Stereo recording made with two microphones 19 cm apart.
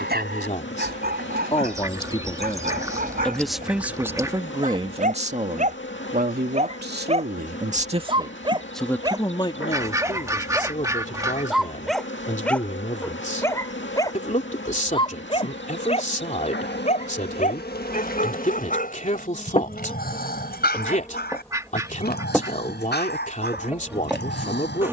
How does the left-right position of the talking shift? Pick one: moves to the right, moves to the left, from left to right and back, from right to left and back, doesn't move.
from left to right and back.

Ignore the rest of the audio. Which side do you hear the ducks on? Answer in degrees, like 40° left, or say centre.
20° right.